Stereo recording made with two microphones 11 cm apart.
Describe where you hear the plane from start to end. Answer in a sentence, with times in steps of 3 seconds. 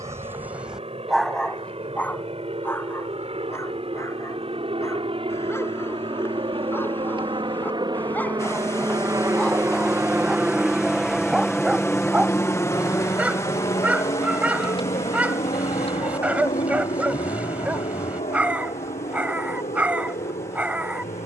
In this clip you hear the plane on the right from 0 s, in the centre from 9 s and on the left from 12 s.